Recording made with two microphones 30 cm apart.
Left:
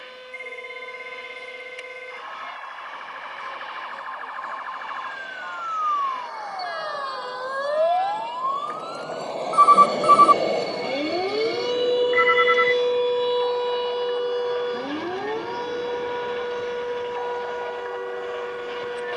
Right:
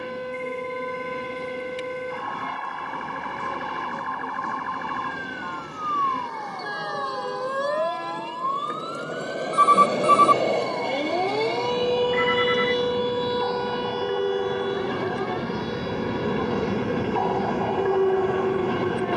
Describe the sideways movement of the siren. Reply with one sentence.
You can hear the siren move to the left.